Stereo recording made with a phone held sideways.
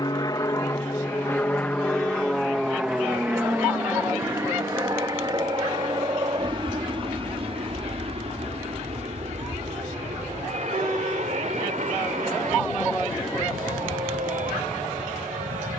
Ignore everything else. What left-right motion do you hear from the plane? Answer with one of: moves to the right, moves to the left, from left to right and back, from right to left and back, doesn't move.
moves to the right.